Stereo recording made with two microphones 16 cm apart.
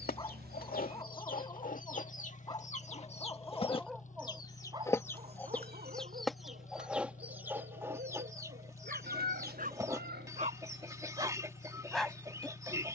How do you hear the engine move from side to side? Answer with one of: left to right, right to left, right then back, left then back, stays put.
stays put.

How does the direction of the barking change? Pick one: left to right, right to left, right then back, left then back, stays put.
right then back.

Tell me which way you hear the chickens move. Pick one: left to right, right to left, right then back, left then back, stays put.
left to right.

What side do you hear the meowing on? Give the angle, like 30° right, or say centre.
70° right.